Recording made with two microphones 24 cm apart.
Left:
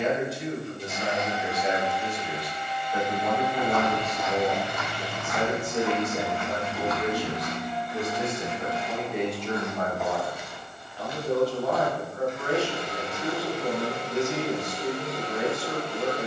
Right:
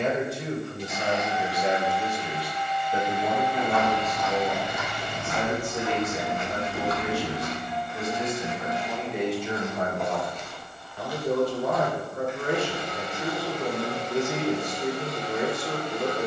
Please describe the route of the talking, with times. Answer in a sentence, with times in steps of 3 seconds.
You can hear the talking on the right from 0 s, in the centre from 3 s, on the left from 6 s and on the right from 9 s.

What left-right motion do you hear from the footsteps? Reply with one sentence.
You can hear the footsteps go right and come back.